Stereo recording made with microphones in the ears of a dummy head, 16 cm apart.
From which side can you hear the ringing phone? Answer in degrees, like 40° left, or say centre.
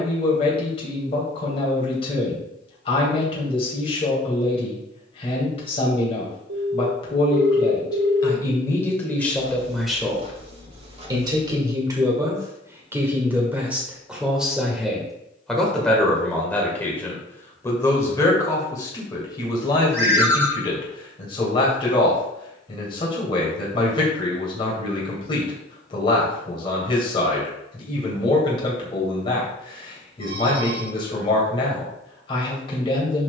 60° right.